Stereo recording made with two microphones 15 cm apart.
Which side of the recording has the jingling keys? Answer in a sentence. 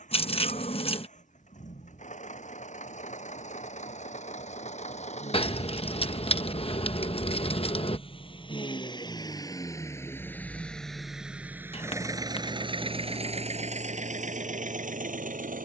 You can hear the jingling keys on the left.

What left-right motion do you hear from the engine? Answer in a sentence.
In this clip you hear the engine travel towards the right.